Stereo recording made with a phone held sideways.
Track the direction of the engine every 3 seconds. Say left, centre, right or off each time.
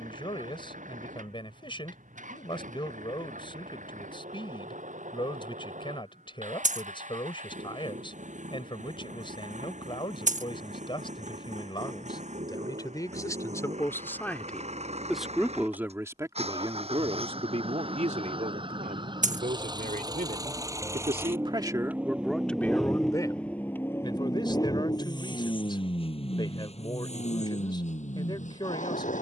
right, right, right, right, right, right, right, centre, left, left.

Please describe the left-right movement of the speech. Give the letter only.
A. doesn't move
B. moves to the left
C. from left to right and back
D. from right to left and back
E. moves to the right
C.